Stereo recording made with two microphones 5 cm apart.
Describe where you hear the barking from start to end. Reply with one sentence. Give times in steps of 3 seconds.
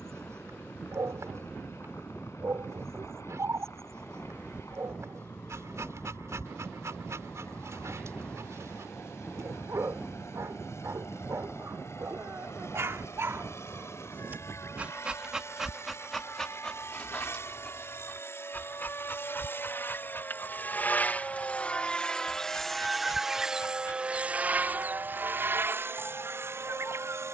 You can hear the barking on the right from 0 s, in the centre from 15 s and on the left from 18 s.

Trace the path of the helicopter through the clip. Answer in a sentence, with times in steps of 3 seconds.
You can hear the helicopter on the left from 0 s, in the centre from 21 s and on the right from 24 s.